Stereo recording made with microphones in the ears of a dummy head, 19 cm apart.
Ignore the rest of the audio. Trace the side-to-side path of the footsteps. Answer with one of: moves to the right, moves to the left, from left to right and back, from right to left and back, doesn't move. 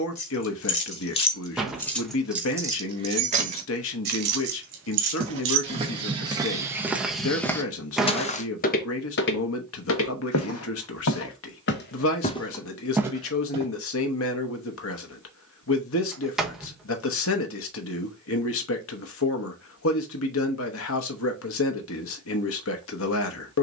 from right to left and back.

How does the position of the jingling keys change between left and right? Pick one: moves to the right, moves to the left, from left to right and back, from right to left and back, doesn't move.
moves to the right.